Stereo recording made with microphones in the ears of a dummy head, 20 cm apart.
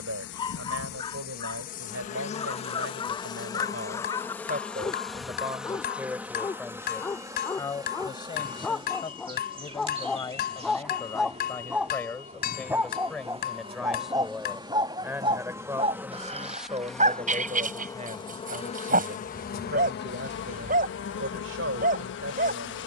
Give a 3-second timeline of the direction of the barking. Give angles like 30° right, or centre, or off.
20° left, 20° left, 10° left, centre, 10° right, 30° right, 40° right, 40° right.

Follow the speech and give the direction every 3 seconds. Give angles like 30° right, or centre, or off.
60° right, 40° right, 10° left, 10° left, centre, 20° right, 40° right, 60° right.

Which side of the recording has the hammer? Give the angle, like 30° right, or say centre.
40° left.